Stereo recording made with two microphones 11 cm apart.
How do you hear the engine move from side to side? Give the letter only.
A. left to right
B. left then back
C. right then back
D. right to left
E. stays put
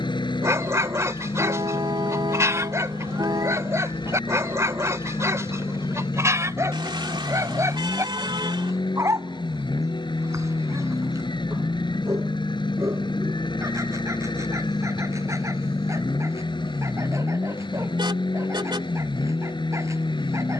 E.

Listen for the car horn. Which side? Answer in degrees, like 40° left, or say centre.
50° right.